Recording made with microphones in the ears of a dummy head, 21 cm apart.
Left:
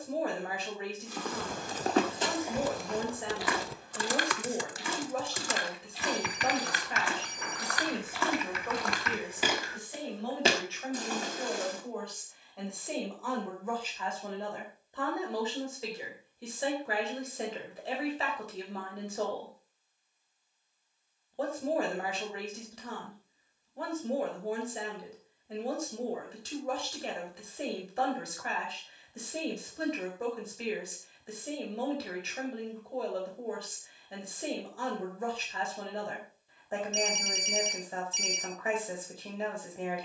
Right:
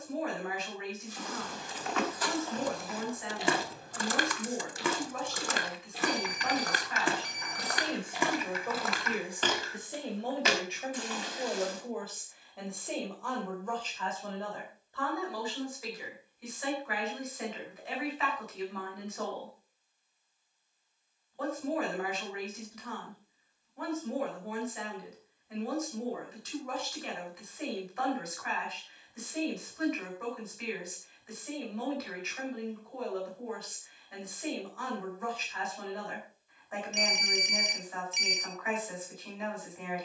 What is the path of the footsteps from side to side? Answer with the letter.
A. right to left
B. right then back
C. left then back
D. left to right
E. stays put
B.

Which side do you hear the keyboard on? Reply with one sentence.
In this clip you hear the keyboard on the left.